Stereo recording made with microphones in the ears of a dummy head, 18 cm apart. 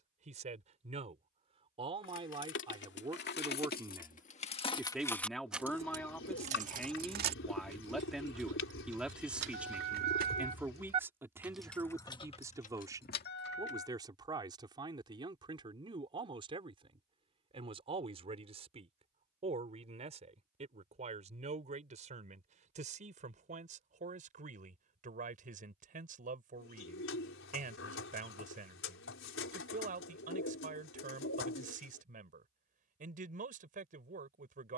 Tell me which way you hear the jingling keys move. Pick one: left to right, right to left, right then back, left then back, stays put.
right then back.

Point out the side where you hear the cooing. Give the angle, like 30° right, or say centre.
70° left.